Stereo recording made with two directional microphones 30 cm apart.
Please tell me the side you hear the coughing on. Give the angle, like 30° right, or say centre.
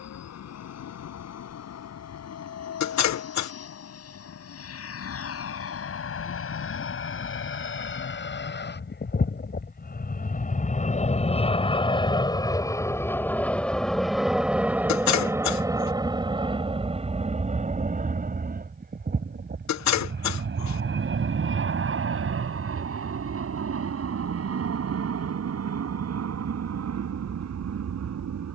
60° left.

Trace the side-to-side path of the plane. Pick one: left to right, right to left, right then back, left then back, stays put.
left to right.